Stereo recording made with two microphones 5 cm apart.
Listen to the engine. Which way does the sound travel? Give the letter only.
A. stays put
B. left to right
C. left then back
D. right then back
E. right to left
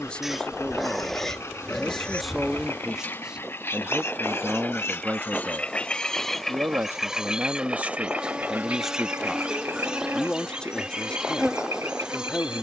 B.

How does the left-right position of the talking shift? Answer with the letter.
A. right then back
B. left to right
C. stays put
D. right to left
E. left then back
A.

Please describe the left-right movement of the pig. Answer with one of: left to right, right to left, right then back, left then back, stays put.
left then back.